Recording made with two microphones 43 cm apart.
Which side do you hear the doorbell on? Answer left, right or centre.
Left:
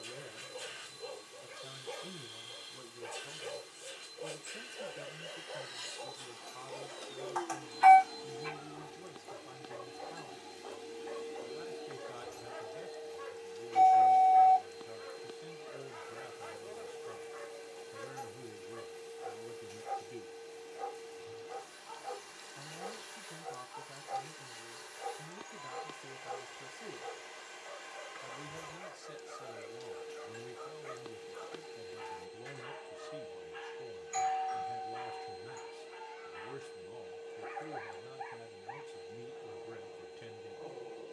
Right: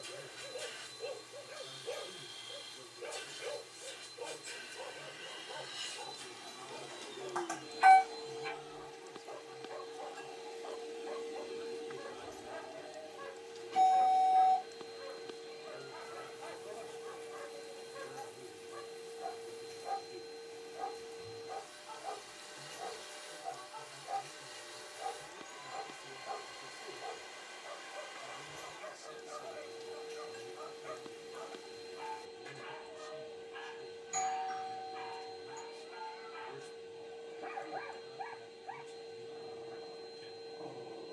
right.